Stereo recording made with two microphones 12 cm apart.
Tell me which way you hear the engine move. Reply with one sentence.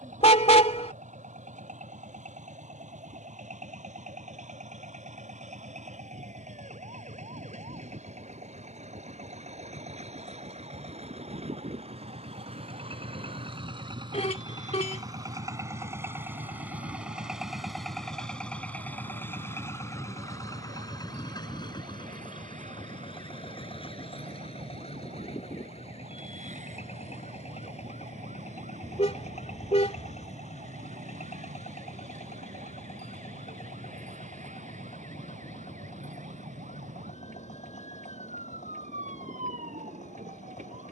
In this clip you hear the engine go from the right side to the left.